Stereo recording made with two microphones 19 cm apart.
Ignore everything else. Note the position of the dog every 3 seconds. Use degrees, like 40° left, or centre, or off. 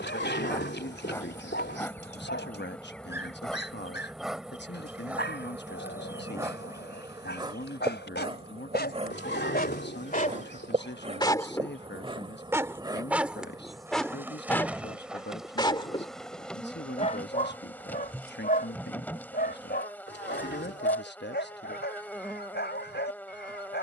70° left, 70° left, 70° left, 30° left, centre, 30° left, 60° left, 70° left.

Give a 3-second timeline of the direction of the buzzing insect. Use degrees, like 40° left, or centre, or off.
10° left, centre, 20° right, 40° right, 20° right, centre, 10° left, 10° left.